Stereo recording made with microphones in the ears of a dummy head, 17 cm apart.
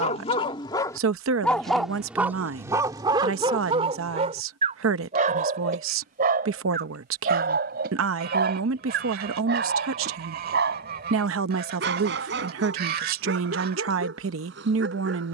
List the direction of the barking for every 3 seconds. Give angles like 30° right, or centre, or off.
centre, 30° right, 50° right, 60° right, 60° right.